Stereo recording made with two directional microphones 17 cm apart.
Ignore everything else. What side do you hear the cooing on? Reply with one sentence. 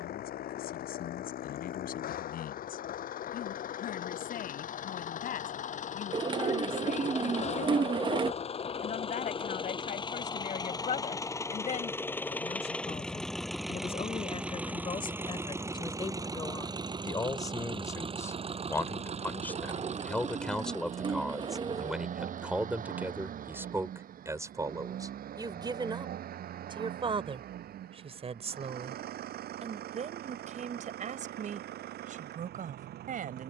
In this clip you hear the cooing on the right.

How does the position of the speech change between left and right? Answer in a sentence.
You can hear the speech go from the left side to the right.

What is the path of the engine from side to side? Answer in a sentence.
You can hear the engine move from left to right.